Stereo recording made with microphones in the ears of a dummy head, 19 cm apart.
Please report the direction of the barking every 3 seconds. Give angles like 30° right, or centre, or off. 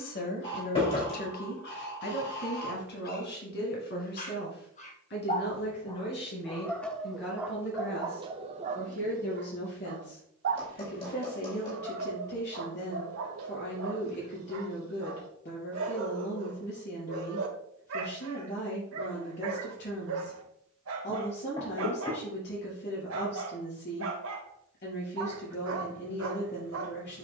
50° left, 30° left, 10° right, 60° right, 70° right, 70° right, 70° right, 70° right, 70° right.